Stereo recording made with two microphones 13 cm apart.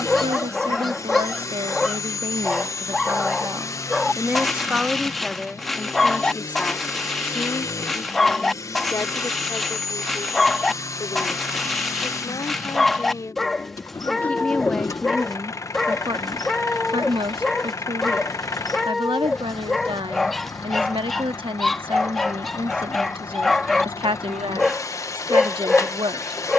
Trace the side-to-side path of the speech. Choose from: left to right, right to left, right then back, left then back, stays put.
left then back.